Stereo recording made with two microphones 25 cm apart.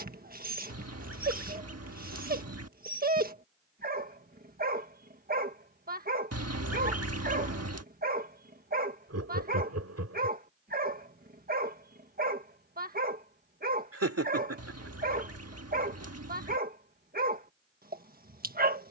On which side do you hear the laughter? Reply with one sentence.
You can hear the laughter on the right.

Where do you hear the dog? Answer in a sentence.
You can hear the dog on the right.